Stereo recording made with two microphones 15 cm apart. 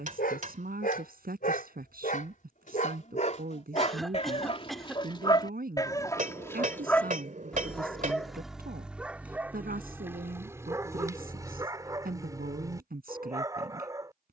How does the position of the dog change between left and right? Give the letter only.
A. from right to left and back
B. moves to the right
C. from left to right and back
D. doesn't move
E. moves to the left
B.